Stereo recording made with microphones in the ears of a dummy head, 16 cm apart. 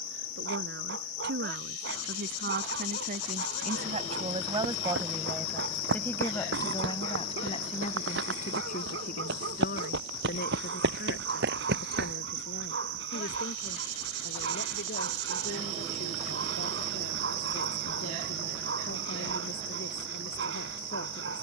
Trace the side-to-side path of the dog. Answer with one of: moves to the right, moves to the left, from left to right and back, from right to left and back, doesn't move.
doesn't move.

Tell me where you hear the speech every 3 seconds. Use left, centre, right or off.
right, right, left, left, left, left, left.